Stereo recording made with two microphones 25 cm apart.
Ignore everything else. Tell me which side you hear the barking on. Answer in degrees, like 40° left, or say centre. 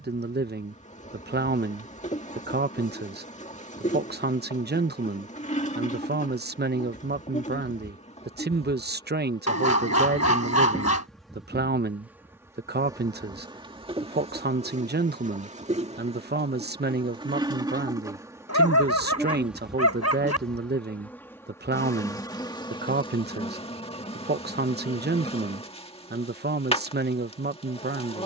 80° left.